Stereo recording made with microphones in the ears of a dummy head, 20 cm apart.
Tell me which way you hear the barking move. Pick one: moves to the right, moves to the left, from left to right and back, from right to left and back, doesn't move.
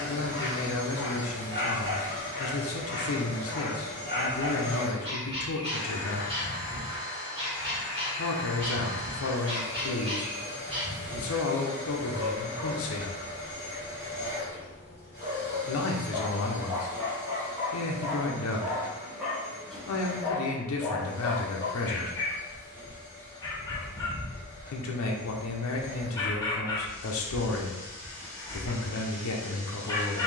moves to the left.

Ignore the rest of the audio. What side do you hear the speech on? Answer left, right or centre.
left.